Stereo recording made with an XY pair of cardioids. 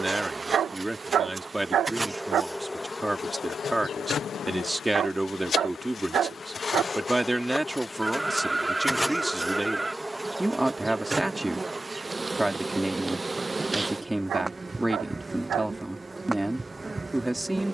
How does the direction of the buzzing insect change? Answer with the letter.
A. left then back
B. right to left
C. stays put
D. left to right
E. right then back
A.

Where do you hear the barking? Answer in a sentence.
In this clip you hear the barking on the right.